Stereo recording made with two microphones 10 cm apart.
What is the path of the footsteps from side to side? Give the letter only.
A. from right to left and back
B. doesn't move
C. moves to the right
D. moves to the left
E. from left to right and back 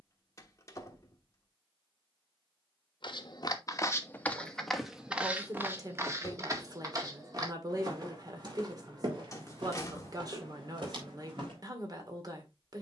C.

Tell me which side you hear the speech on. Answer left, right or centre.
right.